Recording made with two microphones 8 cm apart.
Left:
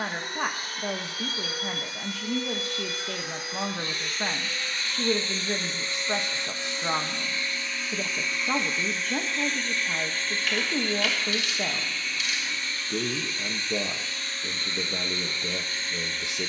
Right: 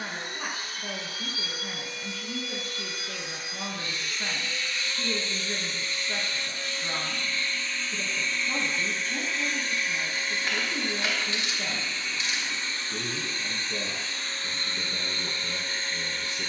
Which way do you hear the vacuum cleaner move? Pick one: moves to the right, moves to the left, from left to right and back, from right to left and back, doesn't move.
moves to the right.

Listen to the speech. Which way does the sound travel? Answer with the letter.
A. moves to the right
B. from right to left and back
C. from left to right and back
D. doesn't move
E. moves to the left
D.